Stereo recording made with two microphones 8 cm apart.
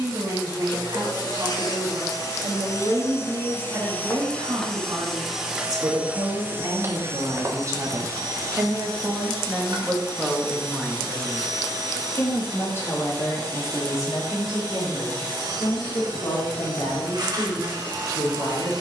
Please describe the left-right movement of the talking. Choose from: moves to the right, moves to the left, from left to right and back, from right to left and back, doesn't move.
moves to the left.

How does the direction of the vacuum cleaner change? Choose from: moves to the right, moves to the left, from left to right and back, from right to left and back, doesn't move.
moves to the right.